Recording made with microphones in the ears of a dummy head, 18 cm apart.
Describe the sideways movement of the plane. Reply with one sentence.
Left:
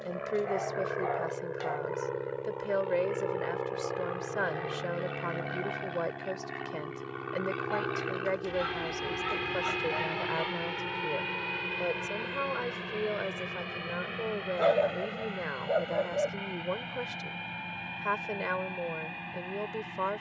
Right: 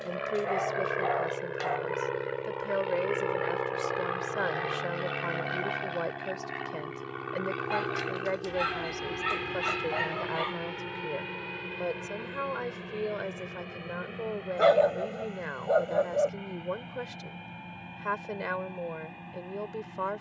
You can hear the plane move to the left.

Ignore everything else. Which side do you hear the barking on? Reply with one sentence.
You can hear the barking on the right.